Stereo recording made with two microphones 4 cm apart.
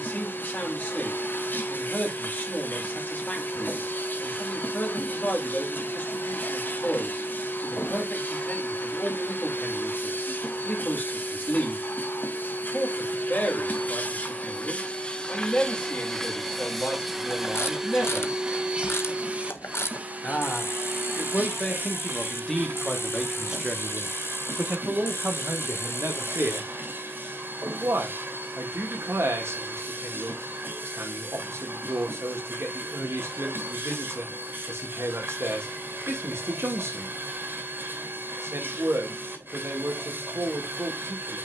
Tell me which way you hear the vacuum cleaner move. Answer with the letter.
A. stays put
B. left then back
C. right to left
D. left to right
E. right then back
D.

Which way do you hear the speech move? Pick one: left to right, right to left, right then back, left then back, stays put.
left to right.